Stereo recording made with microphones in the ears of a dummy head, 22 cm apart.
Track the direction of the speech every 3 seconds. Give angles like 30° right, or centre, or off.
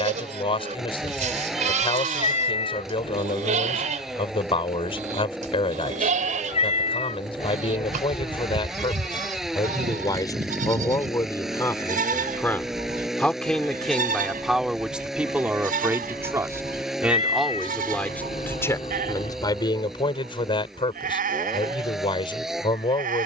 20° left, 20° left, 20° left, 20° left, centre, centre, 20° left, 20° left.